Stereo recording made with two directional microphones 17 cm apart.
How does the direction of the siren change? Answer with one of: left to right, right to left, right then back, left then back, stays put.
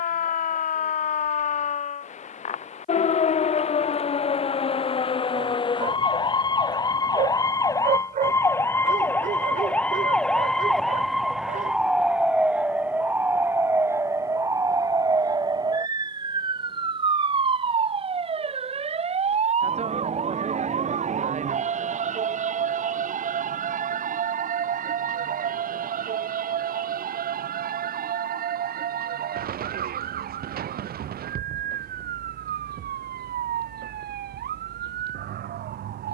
left to right.